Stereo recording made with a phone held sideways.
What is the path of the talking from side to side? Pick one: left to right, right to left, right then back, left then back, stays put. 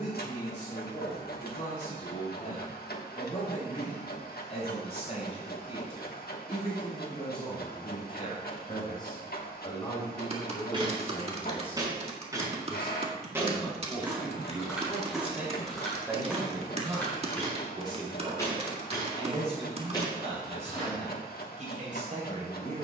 left to right.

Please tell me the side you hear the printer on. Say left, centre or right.
left.